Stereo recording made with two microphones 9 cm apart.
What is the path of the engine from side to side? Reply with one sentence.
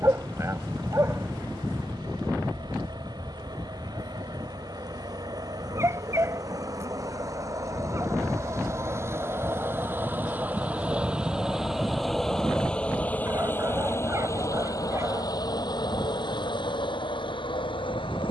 You can hear the engine move from right to left.